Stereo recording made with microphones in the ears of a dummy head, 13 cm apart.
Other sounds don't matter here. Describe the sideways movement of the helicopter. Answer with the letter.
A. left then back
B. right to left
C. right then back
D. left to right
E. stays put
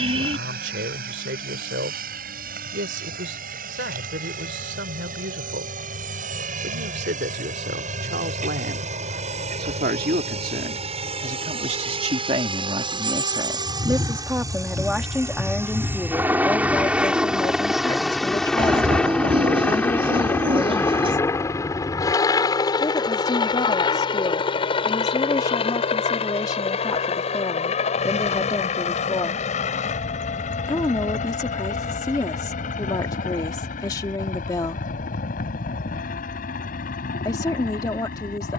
B.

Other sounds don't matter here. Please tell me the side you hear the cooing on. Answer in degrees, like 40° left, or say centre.
40° right.